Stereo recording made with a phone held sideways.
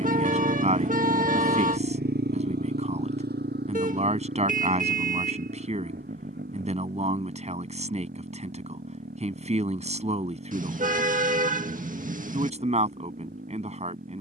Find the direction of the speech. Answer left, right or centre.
right.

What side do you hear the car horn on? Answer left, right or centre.
right.